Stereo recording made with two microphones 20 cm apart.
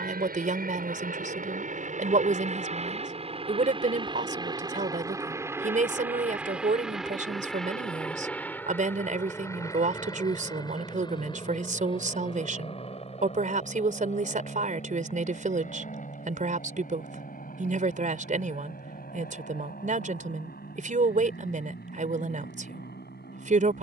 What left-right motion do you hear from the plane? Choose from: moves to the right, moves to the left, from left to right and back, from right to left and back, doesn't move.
moves to the left.